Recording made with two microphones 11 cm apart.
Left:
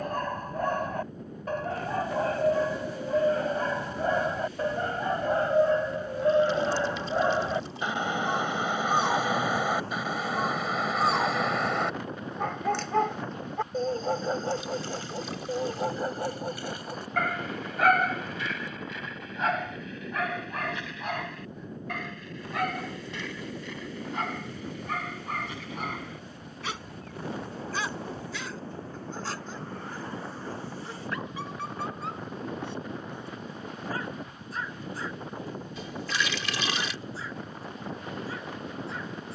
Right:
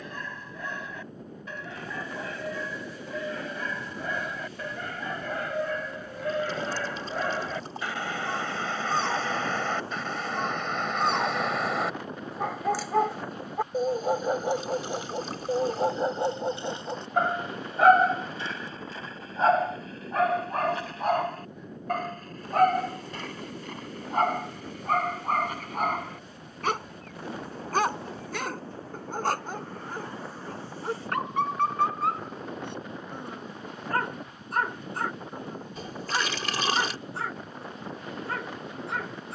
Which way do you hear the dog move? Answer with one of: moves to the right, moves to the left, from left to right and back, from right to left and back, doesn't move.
moves to the right.